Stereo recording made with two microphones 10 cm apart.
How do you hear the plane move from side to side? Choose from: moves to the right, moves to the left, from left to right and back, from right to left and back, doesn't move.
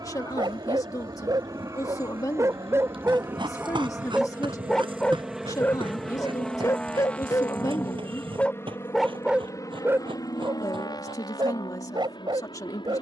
moves to the left.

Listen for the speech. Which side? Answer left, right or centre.
left.